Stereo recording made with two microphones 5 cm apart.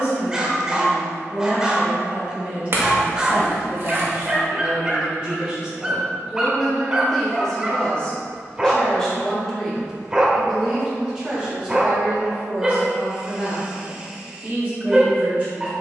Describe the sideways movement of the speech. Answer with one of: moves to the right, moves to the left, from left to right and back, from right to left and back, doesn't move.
from right to left and back.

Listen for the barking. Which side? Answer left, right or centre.
centre.